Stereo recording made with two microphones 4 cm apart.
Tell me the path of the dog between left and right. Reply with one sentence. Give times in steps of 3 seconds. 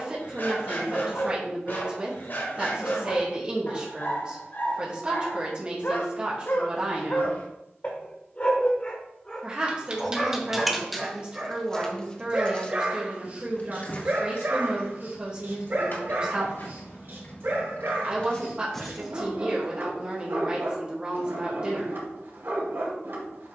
In this clip you hear the dog on the left from 0 s, in the centre from 9 s and on the right from 12 s.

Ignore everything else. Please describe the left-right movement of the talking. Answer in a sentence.
You can hear the talking stay in one place.